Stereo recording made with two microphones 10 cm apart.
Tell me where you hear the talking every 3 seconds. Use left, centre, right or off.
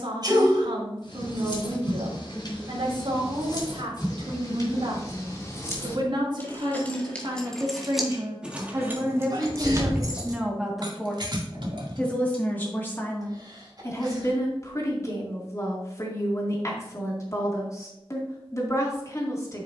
right, right, right, centre, left, left, left.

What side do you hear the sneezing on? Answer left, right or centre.
right.